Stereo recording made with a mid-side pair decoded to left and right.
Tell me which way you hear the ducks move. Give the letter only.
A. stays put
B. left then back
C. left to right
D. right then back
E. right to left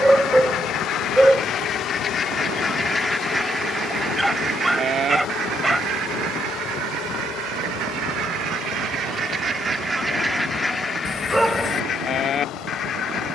D.